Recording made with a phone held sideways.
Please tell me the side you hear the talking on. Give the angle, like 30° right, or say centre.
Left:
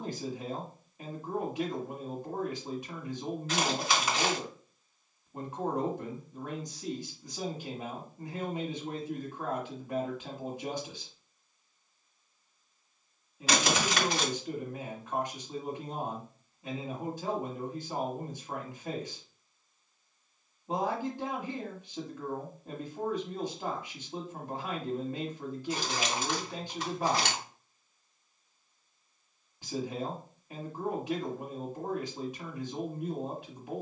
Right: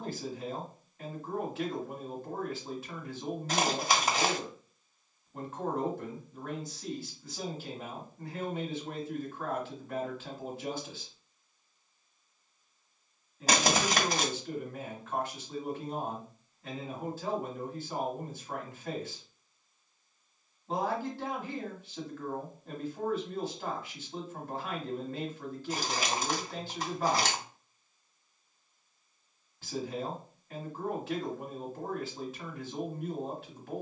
20° left.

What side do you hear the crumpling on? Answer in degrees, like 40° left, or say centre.
40° right.